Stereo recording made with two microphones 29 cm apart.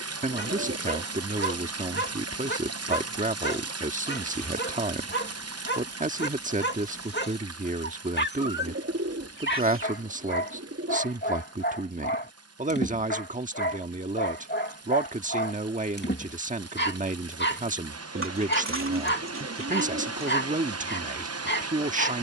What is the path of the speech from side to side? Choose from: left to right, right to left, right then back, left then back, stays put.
stays put.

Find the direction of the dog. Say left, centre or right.
left.